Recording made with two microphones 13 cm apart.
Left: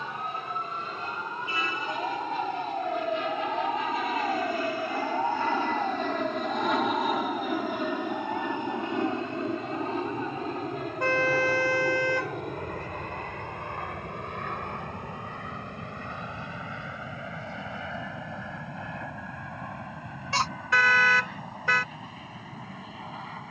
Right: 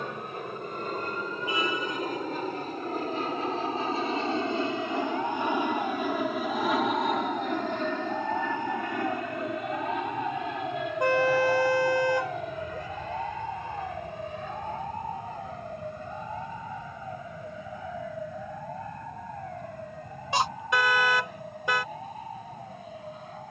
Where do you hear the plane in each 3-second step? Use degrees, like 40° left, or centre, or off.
50° right, 20° right, 10° left, 30° left, 50° left, 60° left, 70° left, 70° left.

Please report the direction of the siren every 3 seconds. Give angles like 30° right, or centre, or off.
60° left, 30° left, 10° right, 30° right, 40° right, 50° right, 60° right, 60° right.